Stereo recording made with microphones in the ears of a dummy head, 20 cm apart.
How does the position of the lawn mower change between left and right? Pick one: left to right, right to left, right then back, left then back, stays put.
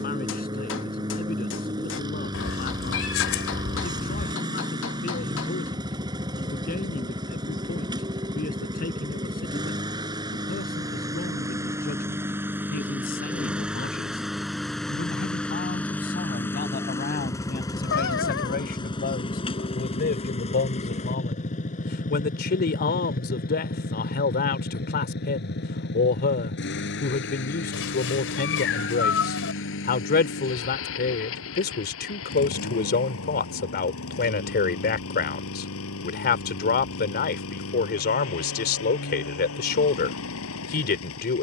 right to left.